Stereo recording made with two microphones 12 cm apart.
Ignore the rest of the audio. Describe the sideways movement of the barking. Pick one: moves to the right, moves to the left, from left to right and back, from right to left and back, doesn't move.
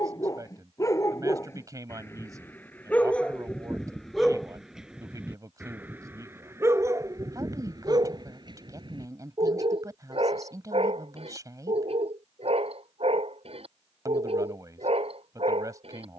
moves to the right.